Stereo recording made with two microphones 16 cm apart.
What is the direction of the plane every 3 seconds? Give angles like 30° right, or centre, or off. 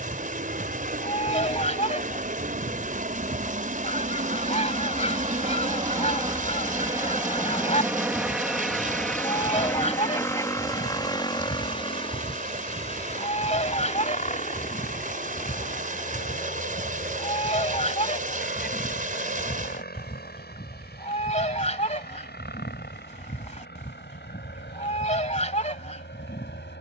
60° right, 40° right, 10° right, 20° left, 40° left, 50° left, 60° left, 60° left, 60° left.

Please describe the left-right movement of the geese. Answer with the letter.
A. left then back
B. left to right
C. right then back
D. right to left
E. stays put
E.